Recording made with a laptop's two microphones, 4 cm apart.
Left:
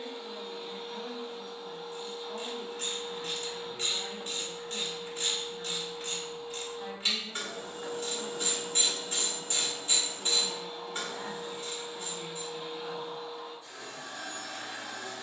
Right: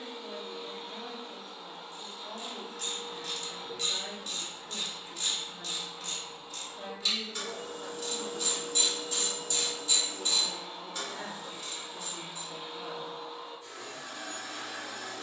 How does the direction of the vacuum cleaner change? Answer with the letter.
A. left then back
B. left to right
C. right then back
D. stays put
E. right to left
D.